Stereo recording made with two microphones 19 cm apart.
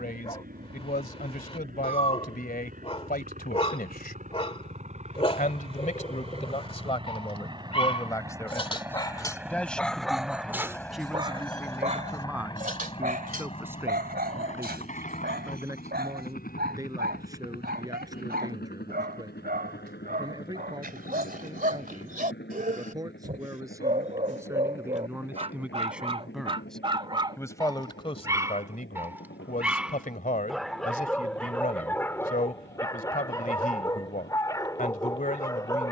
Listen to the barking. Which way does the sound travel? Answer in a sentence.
In this clip you hear the barking move from left to right and back again.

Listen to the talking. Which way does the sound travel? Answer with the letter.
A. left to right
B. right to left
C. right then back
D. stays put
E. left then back
C.